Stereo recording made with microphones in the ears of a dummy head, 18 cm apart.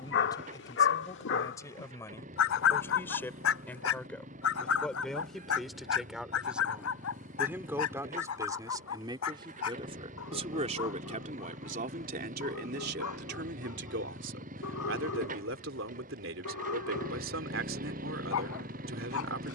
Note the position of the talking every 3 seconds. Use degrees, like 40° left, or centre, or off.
20° left, centre, 10° right, 30° right, 50° right, 70° right, 70° right.